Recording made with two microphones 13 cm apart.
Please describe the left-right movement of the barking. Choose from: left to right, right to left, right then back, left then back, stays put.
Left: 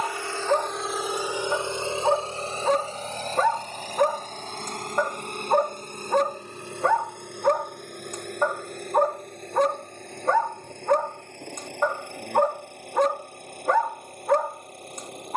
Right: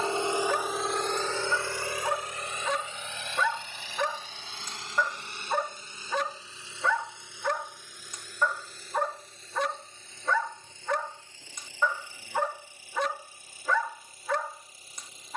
stays put.